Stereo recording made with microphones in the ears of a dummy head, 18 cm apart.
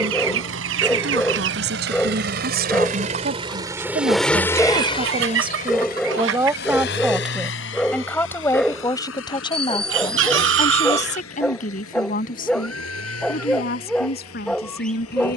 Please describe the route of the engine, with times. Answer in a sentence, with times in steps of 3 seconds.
You can hear the engine on the right from 0 s, in the centre from 3 s and on the left from 6 s.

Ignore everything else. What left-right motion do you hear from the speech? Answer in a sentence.
You can hear the speech go from the right side to the left.